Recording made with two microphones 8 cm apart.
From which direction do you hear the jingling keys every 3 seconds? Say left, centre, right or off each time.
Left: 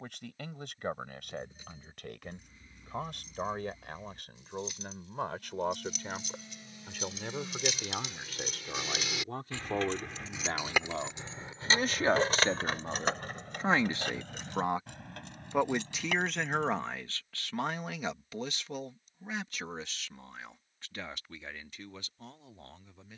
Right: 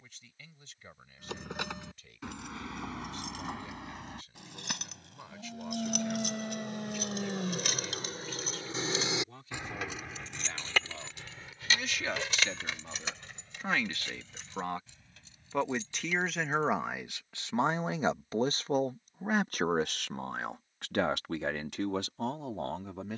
right, right, right, centre, left, left, off, off.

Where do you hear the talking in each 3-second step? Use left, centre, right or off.
left, left, left, left, left, centre, right, right.